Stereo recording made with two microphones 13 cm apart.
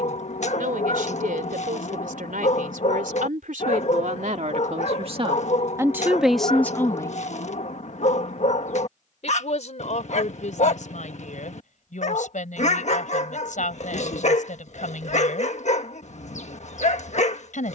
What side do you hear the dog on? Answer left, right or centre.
left.